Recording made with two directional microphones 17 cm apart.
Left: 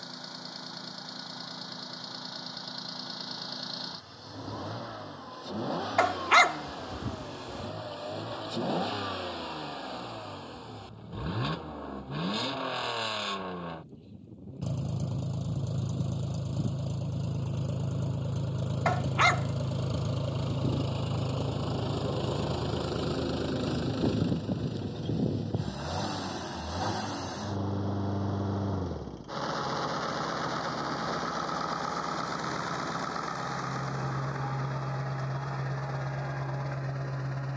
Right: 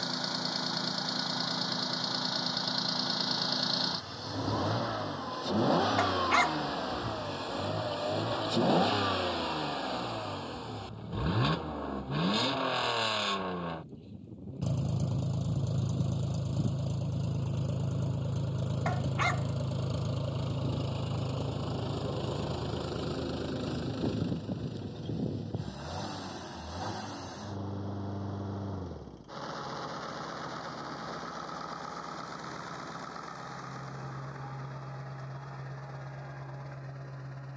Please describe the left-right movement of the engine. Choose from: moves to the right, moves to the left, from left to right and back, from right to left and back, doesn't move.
moves to the left.